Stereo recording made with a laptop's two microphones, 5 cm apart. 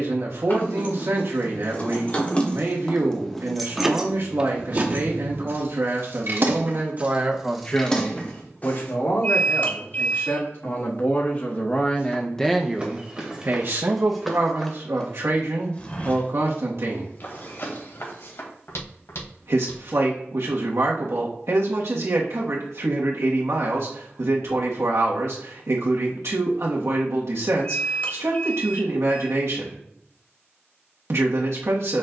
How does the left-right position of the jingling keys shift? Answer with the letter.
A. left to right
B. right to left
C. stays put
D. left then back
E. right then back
E.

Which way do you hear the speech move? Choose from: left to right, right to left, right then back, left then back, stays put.
left then back.